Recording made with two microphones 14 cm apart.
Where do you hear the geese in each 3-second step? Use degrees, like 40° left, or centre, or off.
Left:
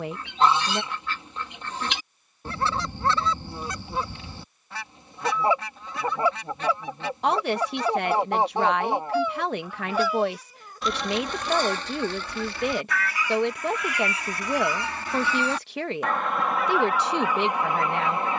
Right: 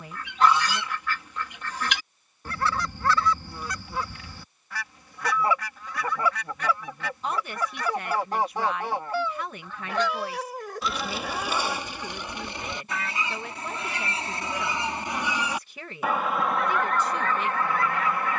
30° left, 30° left, 30° left, centre, 20° right, centre.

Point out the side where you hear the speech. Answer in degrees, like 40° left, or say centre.
70° left.